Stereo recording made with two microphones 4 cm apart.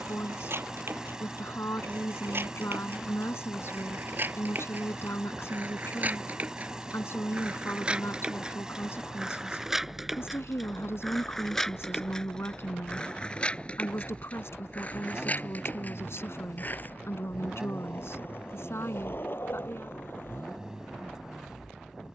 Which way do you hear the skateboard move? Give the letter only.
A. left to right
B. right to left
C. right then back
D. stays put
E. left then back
B.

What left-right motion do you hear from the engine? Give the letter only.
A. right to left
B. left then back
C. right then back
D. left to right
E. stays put
E.